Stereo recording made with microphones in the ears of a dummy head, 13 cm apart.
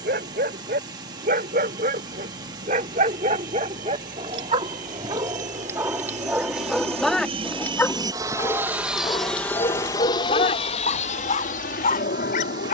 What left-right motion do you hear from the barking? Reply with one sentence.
In this clip you hear the barking go from the right side to the left.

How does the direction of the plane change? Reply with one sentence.
You can hear the plane move to the left.